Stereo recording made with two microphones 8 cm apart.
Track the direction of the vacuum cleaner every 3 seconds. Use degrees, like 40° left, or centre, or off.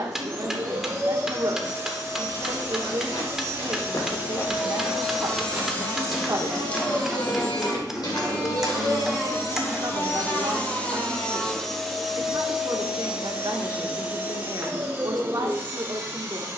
40° right, 10° right, 50° left, 20° left, 10° right, 30° right.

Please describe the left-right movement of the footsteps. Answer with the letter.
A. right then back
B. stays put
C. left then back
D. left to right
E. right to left
A.